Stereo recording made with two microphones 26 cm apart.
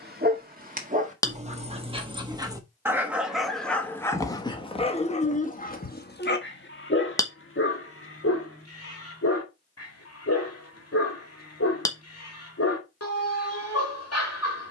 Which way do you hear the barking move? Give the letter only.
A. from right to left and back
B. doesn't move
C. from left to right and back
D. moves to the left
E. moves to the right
D.